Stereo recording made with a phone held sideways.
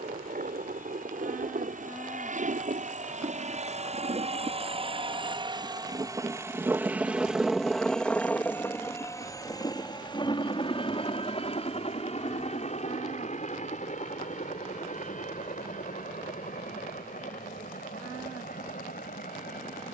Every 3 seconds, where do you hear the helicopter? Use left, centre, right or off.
right, right, centre, left, left, left, left.